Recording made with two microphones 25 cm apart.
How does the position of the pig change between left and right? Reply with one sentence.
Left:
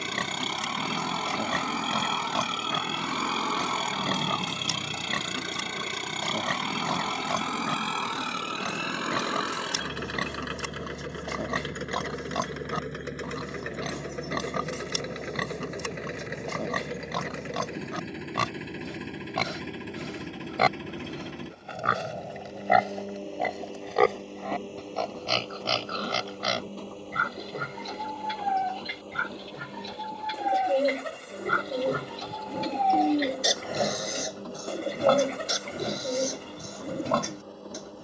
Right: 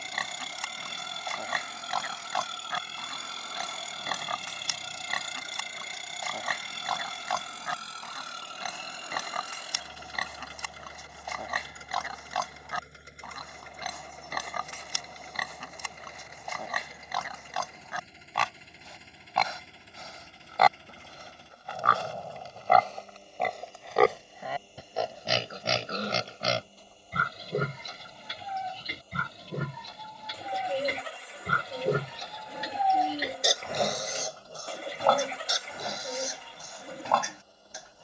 You can hear the pig go right and come back.